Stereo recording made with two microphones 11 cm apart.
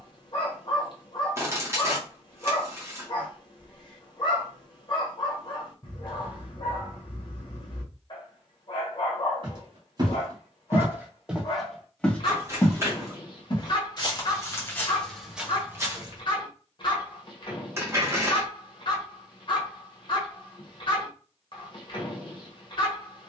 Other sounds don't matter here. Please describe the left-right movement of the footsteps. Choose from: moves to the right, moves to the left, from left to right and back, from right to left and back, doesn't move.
from right to left and back.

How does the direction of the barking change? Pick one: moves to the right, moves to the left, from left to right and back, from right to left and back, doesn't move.
doesn't move.